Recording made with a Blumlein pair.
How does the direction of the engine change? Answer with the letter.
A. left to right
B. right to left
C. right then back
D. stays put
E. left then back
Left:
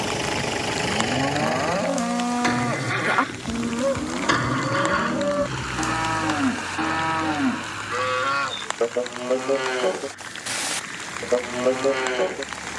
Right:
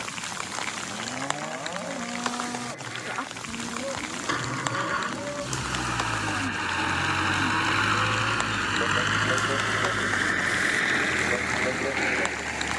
A.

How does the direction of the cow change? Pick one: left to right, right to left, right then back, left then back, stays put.
stays put.